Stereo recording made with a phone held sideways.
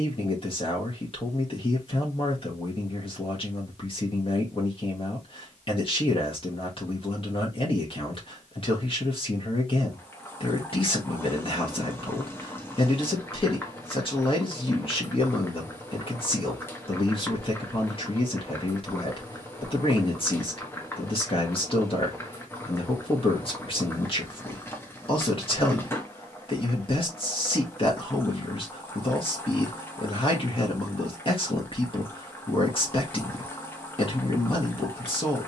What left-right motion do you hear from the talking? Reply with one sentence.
In this clip you hear the talking stay put.